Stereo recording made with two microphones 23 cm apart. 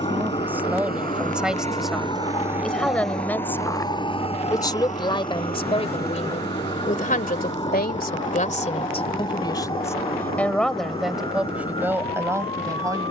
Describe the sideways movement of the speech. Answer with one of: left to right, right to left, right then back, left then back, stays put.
left then back.